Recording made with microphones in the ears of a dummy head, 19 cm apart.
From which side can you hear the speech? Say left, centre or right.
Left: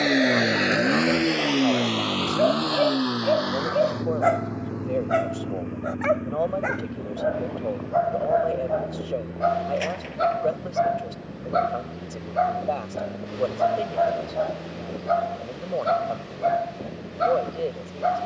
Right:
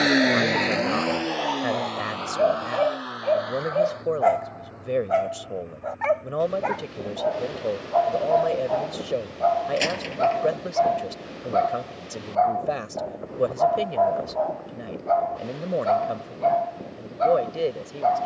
right.